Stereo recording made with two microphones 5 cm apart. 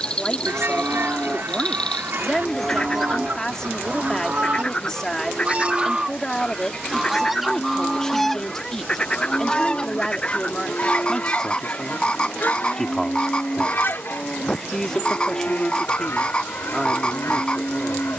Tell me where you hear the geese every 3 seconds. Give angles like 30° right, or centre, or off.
50° right, 30° right, centre, 30° left, 50° left, 60° left.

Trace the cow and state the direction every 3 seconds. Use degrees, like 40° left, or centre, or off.
20° left, 20° right, centre, 20° left, 20° left, 20° left.